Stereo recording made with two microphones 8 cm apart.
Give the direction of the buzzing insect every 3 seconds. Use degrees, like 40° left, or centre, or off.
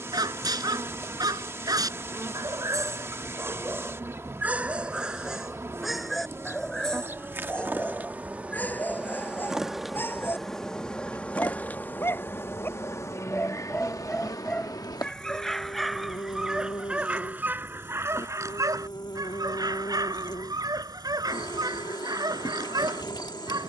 30° right, 30° right, 30° right, 10° left, 40° left, 60° left, 60° left, 60° left.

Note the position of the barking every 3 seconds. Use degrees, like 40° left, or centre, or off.
50° right, 20° right, 10° left, 20° left, 20° left, 10° right, 50° right, 50° right.